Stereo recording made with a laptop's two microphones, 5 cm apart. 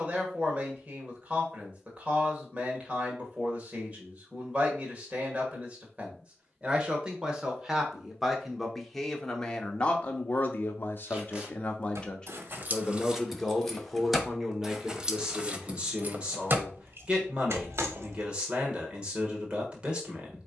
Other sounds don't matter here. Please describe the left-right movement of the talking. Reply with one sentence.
You can hear the talking go left and come back.